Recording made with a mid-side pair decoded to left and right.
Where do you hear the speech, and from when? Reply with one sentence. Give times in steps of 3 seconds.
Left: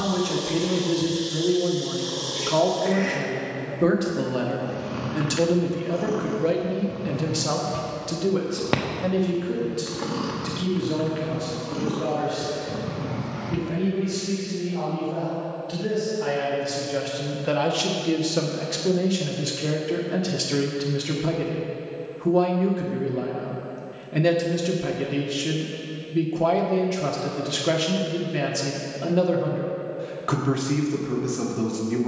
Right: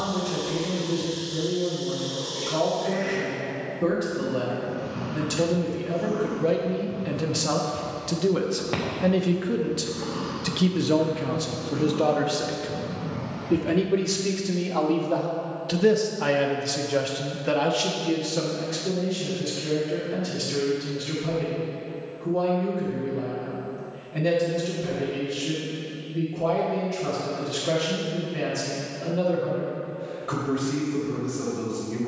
In this clip you hear the speech on the left from 0 s, in the centre from 6 s, on the right from 9 s and on the left from 18 s.